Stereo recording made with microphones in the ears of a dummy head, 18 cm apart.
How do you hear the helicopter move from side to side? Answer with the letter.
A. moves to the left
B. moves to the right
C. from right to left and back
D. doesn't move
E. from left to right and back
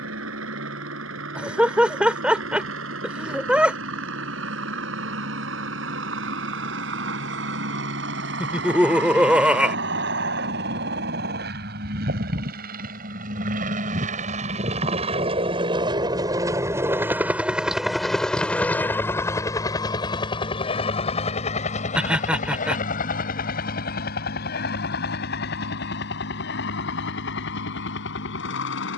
A.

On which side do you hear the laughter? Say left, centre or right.
centre.